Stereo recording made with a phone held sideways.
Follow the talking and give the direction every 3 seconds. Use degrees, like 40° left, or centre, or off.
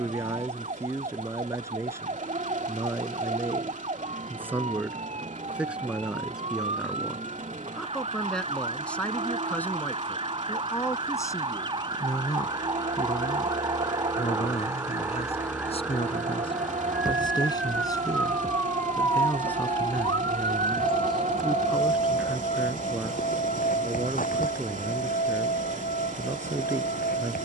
20° right, 10° right, centre, 20° left, 30° left, 30° left, 10° left, 10° right, 20° right.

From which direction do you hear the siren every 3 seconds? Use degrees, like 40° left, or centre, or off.
50° right, 50° right, 40° right, 40° right, 20° right, 10° right, 20° left, 50° left, 70° left.